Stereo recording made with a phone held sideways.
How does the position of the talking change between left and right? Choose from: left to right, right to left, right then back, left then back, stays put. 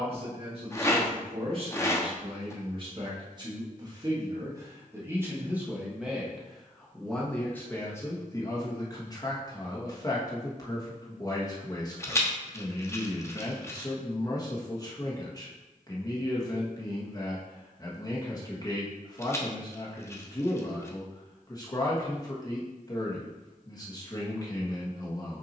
right to left.